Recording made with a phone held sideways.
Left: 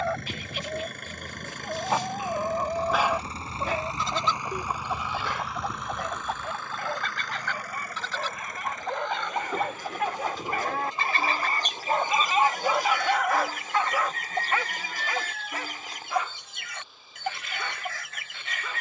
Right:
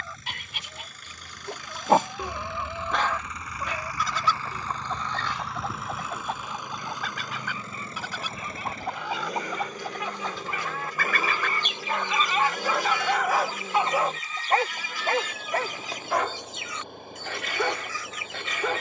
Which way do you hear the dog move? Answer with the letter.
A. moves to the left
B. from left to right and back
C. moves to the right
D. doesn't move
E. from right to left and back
E.